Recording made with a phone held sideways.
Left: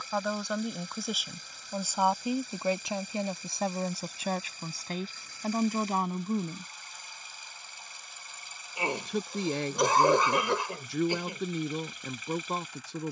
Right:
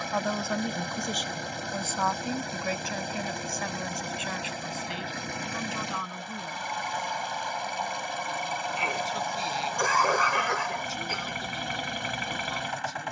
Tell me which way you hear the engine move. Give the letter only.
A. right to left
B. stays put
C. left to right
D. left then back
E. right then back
B.